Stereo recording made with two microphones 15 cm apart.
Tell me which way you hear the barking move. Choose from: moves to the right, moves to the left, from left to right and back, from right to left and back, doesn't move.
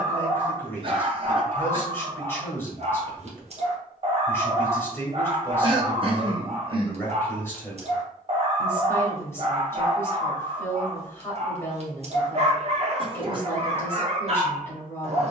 doesn't move.